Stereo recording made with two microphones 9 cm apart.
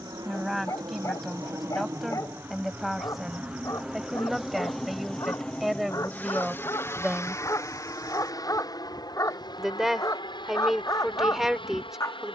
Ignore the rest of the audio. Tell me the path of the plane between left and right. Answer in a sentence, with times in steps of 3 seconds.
You can hear the plane on the right from 0 s, in the centre from 3 s and on the left from 6 s.